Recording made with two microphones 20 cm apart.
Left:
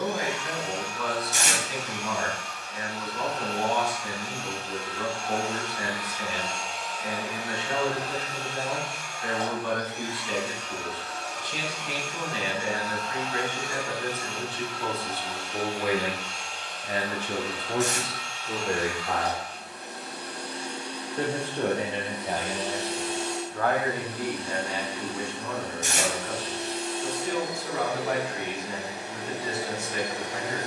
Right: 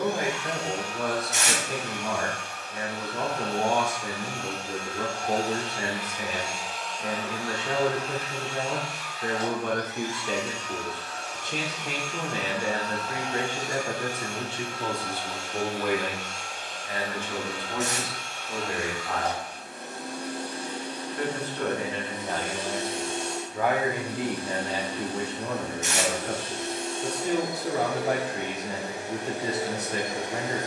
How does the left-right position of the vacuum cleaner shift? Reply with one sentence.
In this clip you hear the vacuum cleaner go left and come back.